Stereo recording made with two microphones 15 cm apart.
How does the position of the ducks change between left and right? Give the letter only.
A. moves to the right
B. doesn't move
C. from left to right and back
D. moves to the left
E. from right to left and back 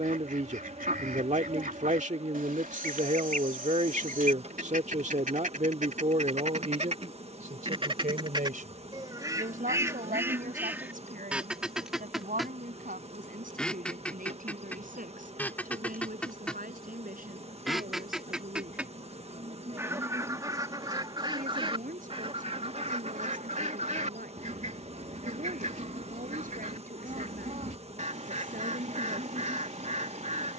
E.